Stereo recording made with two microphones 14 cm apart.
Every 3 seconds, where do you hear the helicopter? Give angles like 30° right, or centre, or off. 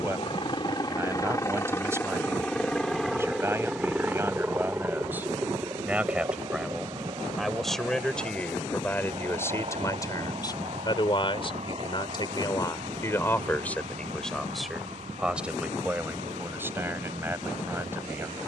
20° left, 10° right, 30° right, 40° right, 50° right, 50° right.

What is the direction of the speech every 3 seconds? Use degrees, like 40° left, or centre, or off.
20° right, 20° right, centre, 30° left, 20° left, 10° right.